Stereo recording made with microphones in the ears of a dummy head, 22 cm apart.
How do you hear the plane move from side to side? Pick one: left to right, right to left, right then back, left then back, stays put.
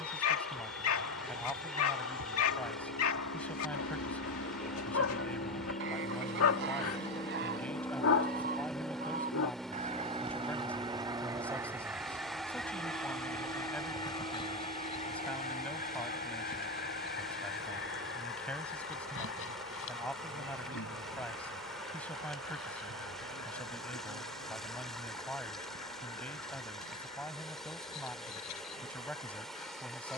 left to right.